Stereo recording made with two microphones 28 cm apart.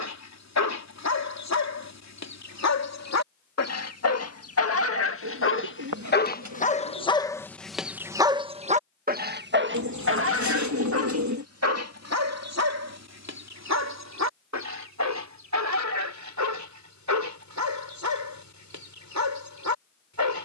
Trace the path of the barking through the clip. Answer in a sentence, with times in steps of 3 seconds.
You can hear the barking on the left from 0 s, in the centre from 6 s and on the right from 9 s.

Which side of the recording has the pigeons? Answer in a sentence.
You can hear the pigeons on the right.